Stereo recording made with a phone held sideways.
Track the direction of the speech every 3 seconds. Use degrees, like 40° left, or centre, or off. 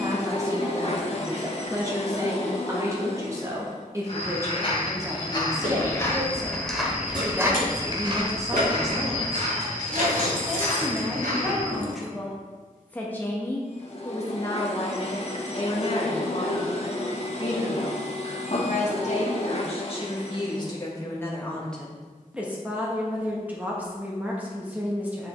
20° right, 20° right, 20° right, 10° right, 20° left, 40° left, 40° left, centre, 10° right.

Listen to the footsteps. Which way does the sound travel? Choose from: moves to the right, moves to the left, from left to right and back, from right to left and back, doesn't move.
moves to the right.